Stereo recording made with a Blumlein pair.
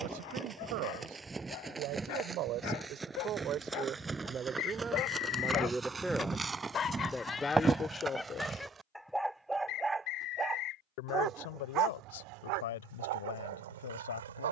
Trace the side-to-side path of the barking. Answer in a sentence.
You can hear the barking go from the left side to the right.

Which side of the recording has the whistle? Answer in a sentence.
You can hear the whistle on the left.